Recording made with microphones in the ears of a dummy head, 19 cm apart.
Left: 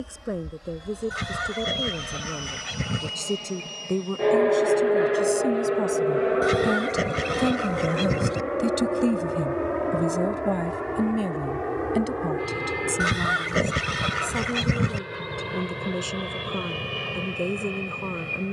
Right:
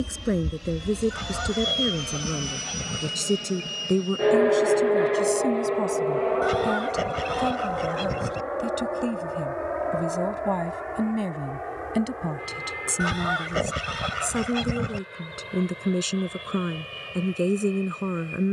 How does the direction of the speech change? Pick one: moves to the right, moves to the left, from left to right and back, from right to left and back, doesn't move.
from right to left and back.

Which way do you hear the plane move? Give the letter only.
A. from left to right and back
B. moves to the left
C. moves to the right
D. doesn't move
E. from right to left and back
B.